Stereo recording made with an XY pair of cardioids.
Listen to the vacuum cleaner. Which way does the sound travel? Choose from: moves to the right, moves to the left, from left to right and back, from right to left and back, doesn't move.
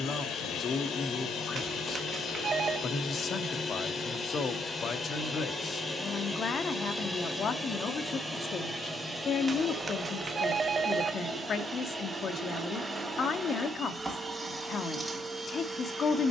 moves to the right.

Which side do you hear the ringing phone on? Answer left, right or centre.
right.